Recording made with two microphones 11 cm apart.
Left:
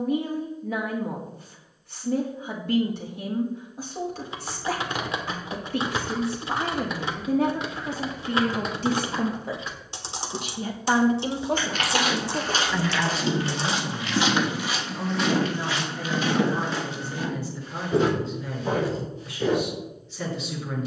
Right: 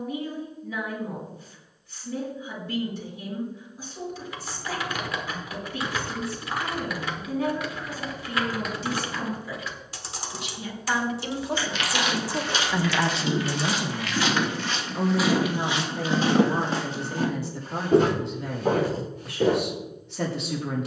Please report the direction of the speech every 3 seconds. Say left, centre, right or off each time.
left, left, left, left, right, right, right.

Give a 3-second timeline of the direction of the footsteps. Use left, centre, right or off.
off, off, off, left, left, right, right.